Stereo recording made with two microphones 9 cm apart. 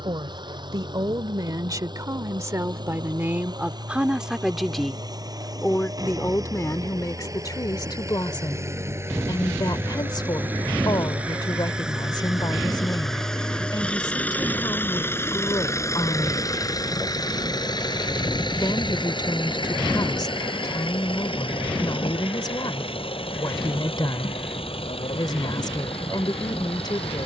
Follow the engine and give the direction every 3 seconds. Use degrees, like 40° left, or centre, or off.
50° right, 40° right, 30° right, 20° right, 10° left, 40° left, 60° left, 70° left, 80° left.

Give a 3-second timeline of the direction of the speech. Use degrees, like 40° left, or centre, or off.
40° right, 10° right, 40° left, 50° left, 50° left, 50° left, 50° left, 50° left, 50° left.